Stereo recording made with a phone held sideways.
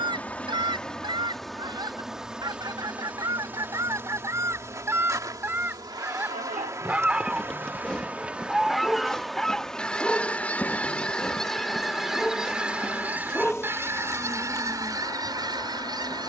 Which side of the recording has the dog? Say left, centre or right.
centre.